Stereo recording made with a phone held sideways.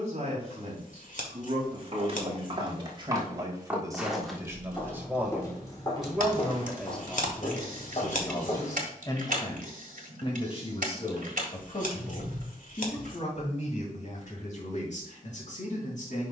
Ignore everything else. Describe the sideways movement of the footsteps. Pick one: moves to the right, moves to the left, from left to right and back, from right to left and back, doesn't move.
moves to the left.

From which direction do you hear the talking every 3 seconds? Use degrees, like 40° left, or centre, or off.
40° right, 20° right, 10° left, 40° left, 50° left, 60° left.